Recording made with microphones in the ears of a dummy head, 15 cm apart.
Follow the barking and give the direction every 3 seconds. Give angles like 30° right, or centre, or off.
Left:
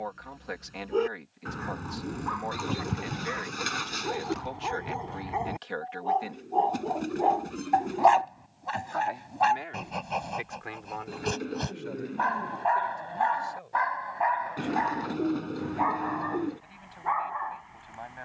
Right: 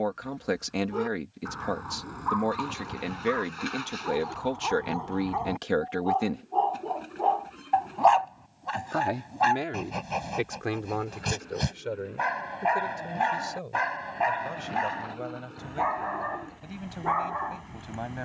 30° left, 20° left, 10° left, 10° right, 30° right, 50° right.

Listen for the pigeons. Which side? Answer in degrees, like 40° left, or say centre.
60° left.